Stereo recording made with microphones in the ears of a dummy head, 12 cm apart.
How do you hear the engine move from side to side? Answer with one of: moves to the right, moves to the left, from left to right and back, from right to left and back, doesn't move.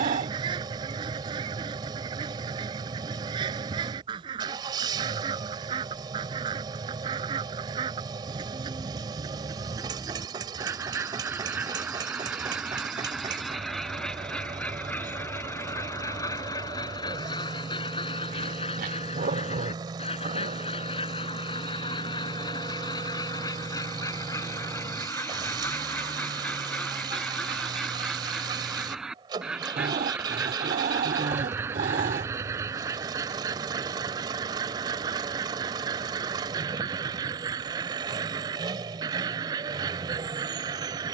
doesn't move.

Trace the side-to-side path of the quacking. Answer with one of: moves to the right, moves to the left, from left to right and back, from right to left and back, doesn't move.
from right to left and back.